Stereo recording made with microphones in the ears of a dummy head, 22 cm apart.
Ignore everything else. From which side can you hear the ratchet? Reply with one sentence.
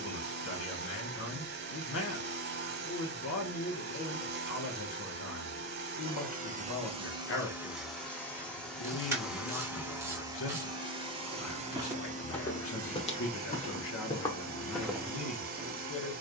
You can hear the ratchet in the centre.